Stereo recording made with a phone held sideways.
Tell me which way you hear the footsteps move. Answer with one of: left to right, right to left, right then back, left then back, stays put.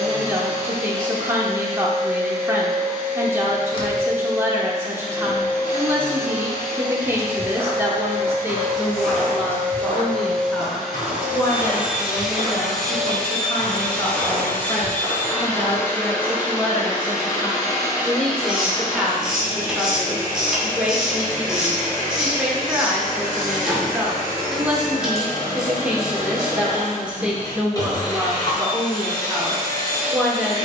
left then back.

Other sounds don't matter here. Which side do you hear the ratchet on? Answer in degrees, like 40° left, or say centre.
centre.